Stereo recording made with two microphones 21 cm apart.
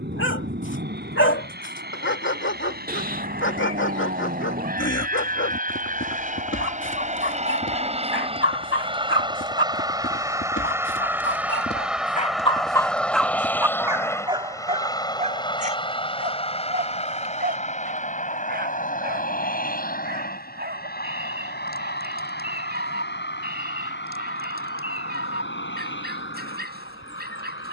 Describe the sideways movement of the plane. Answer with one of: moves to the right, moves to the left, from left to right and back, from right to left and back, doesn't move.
moves to the left.